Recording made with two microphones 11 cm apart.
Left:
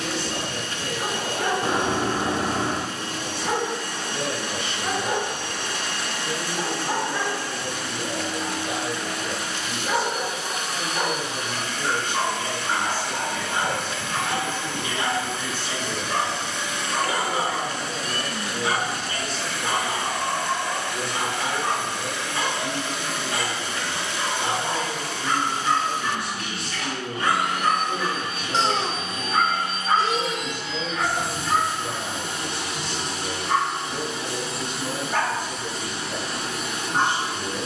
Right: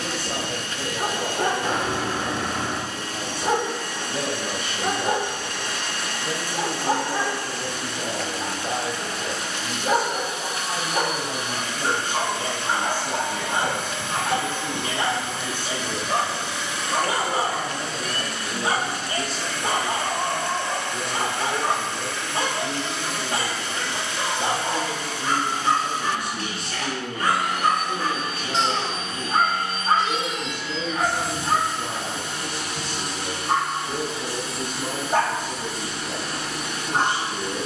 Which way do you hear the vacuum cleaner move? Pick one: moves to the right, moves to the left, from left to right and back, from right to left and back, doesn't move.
from left to right and back.